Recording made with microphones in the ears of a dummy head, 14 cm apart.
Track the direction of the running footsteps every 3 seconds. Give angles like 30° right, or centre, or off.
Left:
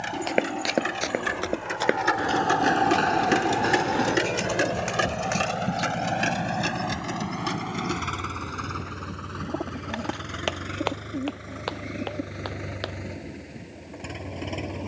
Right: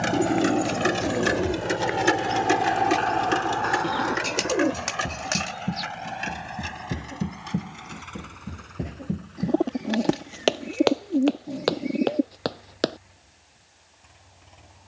70° left, 20° left, 30° right, 40° right, 50° right.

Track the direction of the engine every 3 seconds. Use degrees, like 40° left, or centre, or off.
40° right, 40° left, 70° left, 80° left, 80° left.